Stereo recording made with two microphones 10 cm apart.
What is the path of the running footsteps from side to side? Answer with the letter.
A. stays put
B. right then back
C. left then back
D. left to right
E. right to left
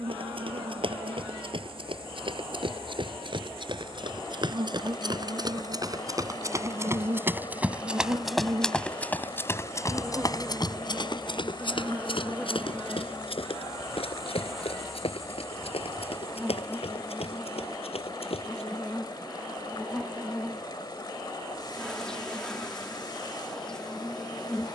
E.